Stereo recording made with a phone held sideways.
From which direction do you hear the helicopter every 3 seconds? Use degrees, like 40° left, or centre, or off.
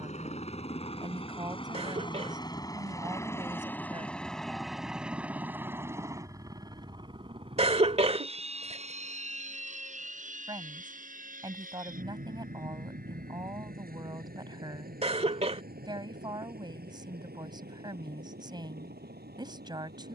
30° left, centre, 30° right, 50° right, 60° right, 70° right, 70° right.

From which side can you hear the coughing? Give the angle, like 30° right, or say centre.
40° right.